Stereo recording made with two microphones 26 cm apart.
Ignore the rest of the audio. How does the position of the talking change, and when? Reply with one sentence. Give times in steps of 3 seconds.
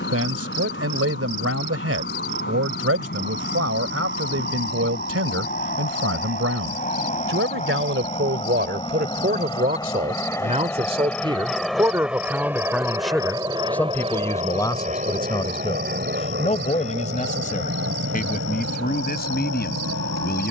In this clip you hear the talking on the right from 0 s, in the centre from 12 s and on the left from 15 s.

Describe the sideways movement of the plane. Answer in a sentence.
You can hear the plane move from left to right.